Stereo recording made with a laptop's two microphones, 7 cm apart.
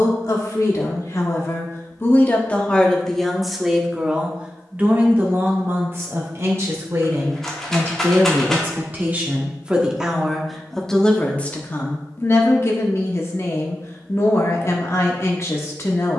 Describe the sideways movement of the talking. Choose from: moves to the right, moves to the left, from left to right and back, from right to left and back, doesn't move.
from left to right and back.